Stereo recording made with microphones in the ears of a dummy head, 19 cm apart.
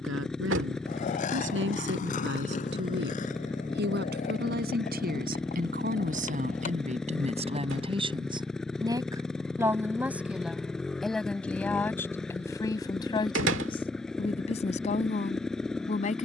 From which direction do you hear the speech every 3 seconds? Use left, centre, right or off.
right, right, right, centre, left, left.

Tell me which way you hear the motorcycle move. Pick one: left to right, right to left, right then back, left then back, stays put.
stays put.